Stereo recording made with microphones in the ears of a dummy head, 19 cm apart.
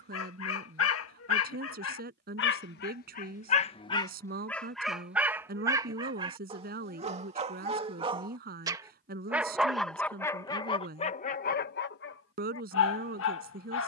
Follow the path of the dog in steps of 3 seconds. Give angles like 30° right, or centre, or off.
70° left, 10° left, 30° right, 20° left, 70° left.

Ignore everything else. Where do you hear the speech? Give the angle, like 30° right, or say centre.
50° right.